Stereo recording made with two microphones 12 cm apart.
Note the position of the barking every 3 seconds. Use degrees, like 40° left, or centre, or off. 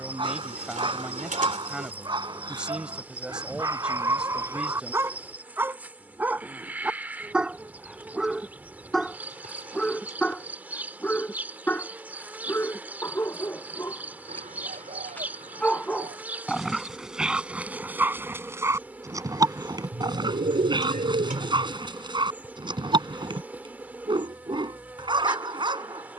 40° right, 20° right, 10° right, 10° left, 20° left, centre, 30° right, 40° right, 40° right.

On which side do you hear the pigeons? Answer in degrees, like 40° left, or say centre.
80° right.